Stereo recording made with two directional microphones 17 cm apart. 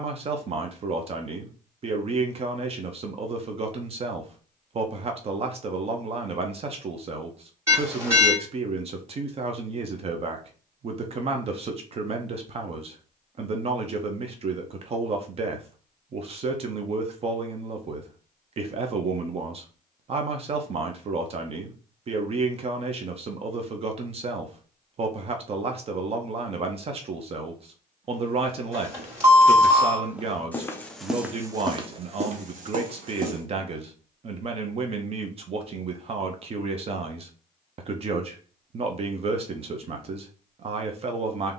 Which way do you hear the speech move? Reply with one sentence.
You can hear the speech stay put.